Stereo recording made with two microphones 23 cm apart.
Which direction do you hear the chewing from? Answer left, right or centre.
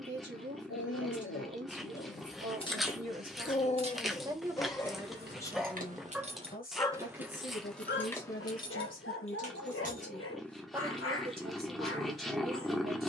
centre.